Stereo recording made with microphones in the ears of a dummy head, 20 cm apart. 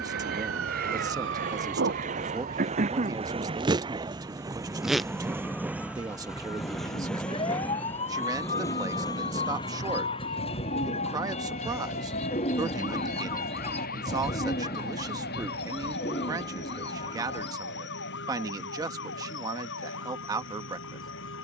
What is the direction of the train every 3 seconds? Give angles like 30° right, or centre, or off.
40° right, 20° right, 10° left, 20° left, 40° left, 50° left, 50° left.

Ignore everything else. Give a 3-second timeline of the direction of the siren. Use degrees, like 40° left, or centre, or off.
50° right, 10° right, 20° left, 40° left, 40° left, 50° left, 50° left.